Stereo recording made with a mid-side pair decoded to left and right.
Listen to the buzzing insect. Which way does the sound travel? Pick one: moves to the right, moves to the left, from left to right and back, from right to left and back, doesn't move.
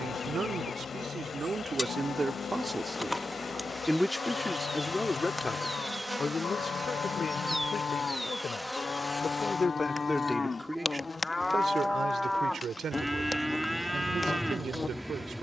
from left to right and back.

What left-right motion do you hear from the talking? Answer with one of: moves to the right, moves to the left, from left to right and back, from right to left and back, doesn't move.
from right to left and back.